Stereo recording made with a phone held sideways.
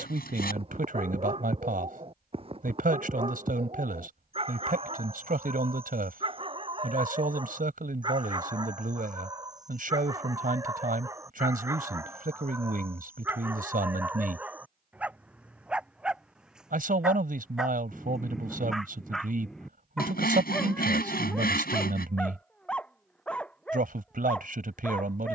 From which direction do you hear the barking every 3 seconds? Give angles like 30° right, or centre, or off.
40° right, 40° right, 30° right, 20° right, 10° right, 10° right, centre, 10° left, 10° left.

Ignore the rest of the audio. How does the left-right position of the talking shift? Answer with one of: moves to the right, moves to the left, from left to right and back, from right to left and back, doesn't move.
doesn't move.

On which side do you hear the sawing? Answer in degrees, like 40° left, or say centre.
70° left.